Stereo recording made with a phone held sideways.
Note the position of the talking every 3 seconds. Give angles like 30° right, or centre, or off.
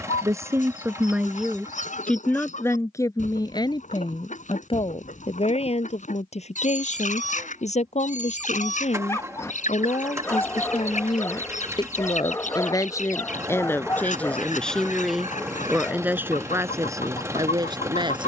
centre, 30° left, 50° left, 40° left, 20° left, 20° right.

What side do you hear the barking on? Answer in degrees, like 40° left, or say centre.
20° left.